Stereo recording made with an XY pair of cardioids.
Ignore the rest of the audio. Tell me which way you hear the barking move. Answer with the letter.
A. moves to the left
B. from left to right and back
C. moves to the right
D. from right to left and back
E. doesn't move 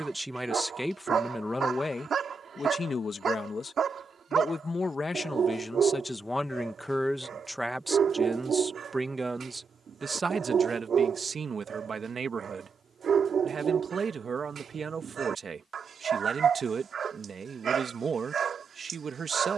E.